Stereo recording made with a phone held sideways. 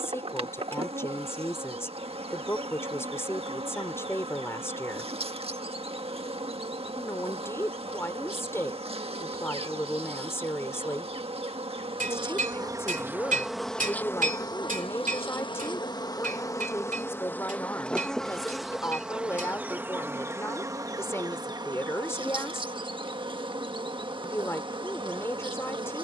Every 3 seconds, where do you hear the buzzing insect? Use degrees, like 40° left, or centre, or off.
40° right, 40° right, 40° right, 40° right, centre, 20° left, 10° right, 30° right, 30° right.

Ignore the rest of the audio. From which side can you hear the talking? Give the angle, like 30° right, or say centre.
20° left.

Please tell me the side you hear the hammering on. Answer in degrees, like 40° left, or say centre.
50° right.